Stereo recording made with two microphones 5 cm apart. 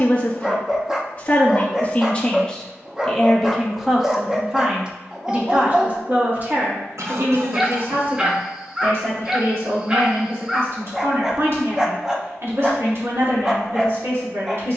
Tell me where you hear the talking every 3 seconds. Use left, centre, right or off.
left, centre, right, right, right.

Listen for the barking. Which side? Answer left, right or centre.
centre.